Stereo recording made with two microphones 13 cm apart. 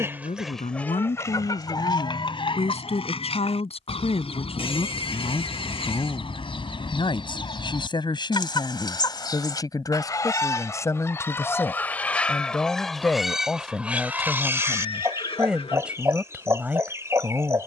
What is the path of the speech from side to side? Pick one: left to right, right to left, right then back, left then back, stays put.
left to right.